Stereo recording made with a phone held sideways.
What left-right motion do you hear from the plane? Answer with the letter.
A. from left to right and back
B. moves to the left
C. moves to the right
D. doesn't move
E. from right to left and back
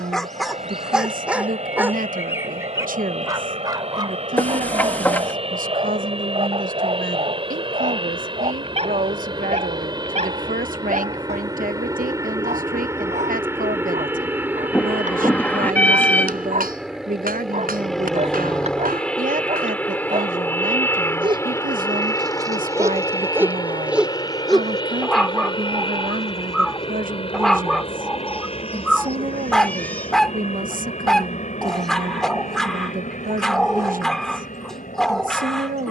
B.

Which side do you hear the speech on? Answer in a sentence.
In this clip you hear the speech on the right.